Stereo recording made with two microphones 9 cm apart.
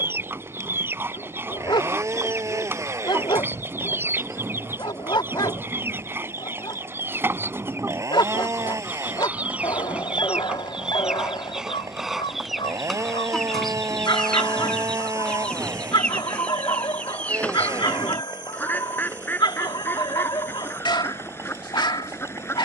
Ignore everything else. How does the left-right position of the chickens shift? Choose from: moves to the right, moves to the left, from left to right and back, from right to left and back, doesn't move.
moves to the left.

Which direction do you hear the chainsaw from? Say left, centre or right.
right.